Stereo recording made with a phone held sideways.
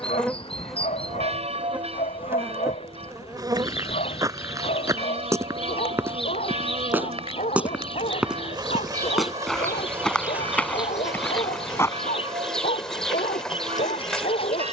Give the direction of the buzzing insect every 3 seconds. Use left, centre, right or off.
centre, right, right, centre, centre.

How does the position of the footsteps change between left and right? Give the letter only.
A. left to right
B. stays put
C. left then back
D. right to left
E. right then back
D.